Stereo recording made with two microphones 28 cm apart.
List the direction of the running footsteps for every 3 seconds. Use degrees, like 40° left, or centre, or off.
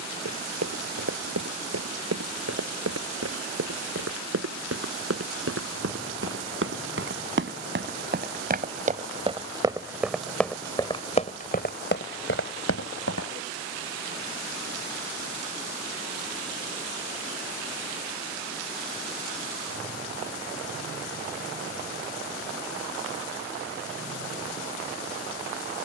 60° right, 60° right, 40° right, 10° left, 50° left, off, off, off, off.